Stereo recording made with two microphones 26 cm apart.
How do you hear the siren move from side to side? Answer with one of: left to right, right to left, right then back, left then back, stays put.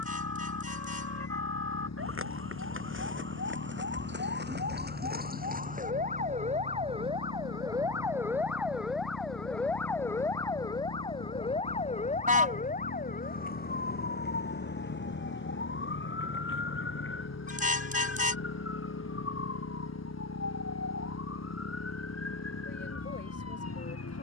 right to left.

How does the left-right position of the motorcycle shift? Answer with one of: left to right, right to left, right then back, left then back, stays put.
stays put.